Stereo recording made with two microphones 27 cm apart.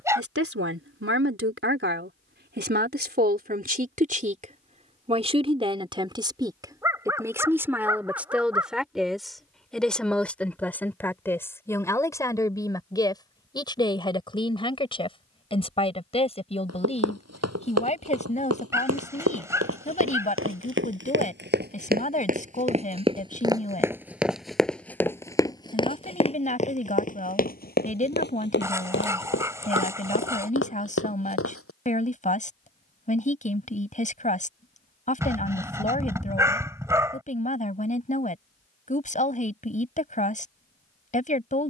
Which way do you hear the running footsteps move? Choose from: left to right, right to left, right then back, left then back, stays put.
right to left.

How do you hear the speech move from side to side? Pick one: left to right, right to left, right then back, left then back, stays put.
right to left.